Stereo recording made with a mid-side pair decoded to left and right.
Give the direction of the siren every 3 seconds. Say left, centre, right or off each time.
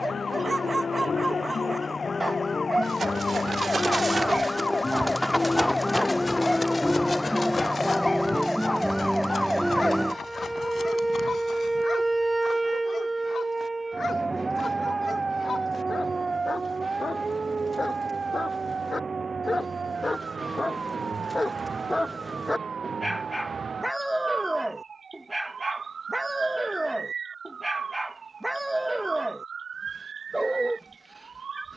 left, left, centre, centre, right, right, right, right, right, right, right.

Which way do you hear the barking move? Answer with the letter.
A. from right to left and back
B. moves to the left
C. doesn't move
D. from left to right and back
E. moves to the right
A.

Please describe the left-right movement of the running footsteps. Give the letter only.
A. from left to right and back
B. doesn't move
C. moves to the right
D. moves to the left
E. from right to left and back
D.